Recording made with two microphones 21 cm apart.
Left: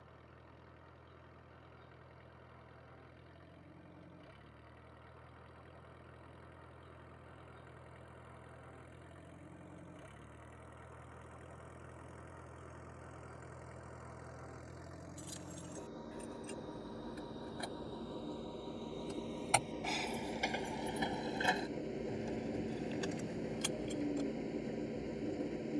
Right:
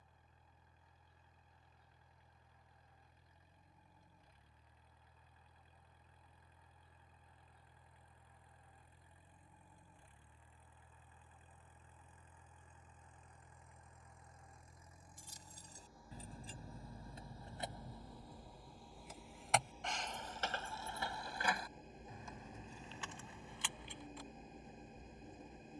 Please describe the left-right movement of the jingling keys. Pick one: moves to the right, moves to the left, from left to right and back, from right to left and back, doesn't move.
moves to the left.